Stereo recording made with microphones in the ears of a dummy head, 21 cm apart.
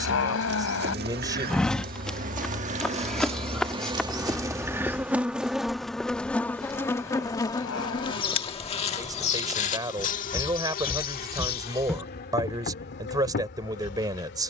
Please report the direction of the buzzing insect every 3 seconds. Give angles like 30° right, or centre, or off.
40° right, 10° right, 20° left, 40° left, 50° left.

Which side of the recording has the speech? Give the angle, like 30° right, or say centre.
20° right.